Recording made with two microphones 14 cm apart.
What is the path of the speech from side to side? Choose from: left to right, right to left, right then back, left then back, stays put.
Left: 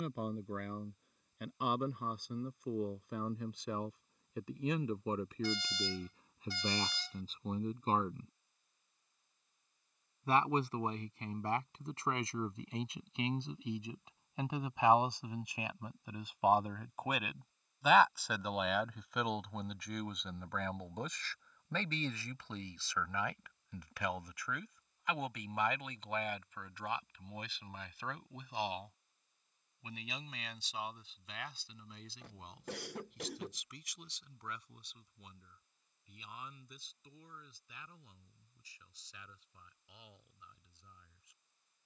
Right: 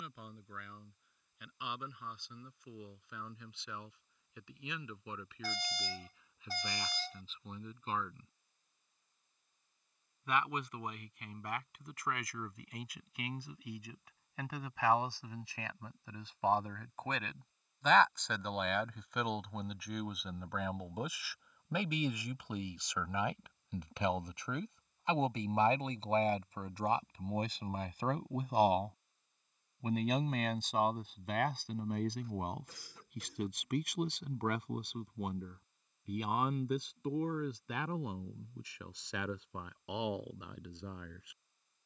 left to right.